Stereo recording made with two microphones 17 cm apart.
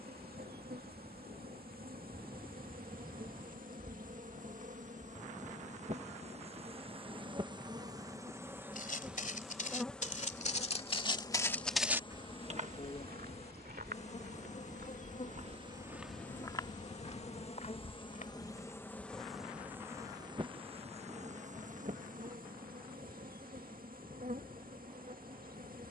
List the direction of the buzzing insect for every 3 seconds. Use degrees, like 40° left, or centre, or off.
70° right, 50° right, 30° right, 10° left, 40° left, 50° left, 10° right, 60° right, 60° right.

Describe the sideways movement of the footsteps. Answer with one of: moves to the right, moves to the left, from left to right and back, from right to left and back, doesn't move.
from left to right and back.